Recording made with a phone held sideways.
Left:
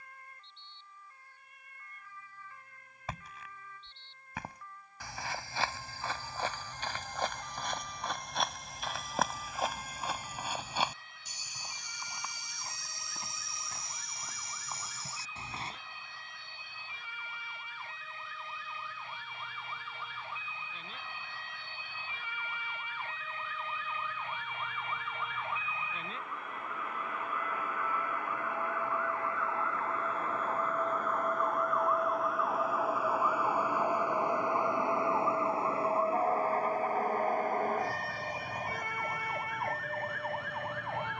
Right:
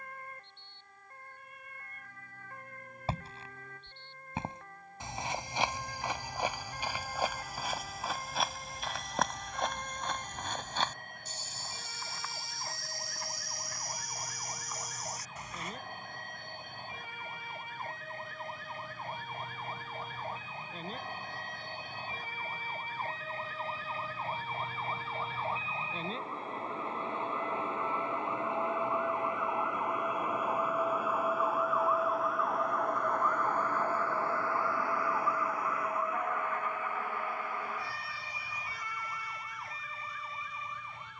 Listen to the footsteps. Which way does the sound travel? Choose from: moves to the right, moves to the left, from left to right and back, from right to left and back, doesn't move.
moves to the left.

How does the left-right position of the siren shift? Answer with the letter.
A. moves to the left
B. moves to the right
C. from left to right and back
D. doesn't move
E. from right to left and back
A.